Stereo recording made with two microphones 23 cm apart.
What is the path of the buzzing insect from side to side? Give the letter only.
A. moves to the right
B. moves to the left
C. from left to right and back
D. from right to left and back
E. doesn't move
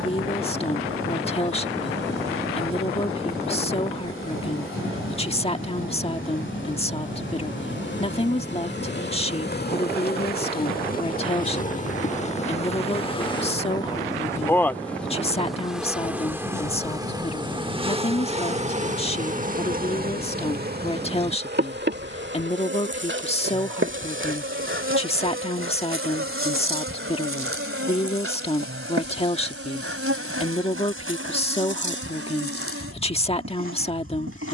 A.